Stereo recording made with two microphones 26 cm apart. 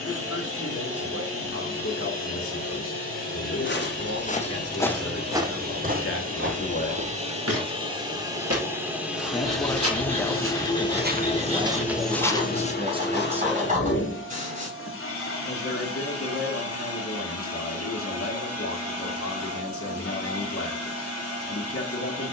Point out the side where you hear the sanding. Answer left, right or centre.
right.